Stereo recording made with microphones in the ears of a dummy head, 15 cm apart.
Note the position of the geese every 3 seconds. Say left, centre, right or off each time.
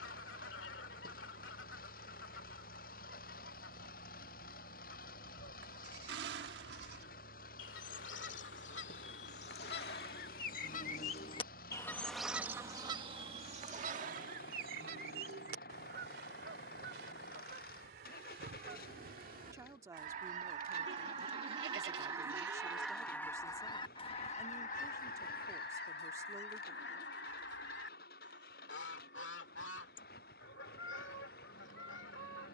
left, left, left, left, right, right, right, centre, left, left, left.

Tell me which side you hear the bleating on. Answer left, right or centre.
right.